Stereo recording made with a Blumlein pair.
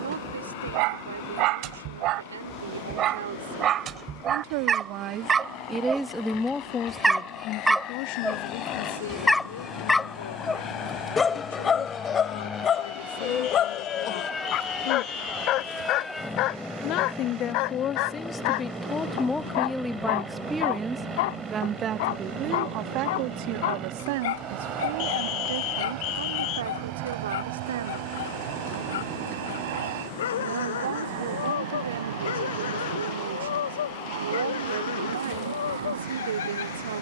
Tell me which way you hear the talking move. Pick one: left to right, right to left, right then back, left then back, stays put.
left then back.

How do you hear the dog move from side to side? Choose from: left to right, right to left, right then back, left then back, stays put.
right to left.